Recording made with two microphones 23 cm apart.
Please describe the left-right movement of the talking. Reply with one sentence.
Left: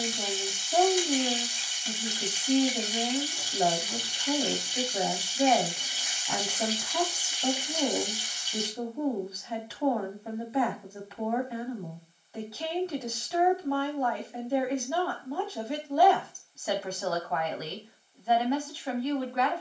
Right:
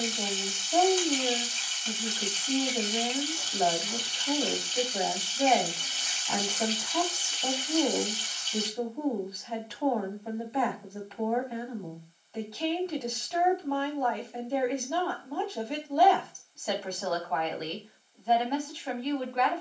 You can hear the talking stay put.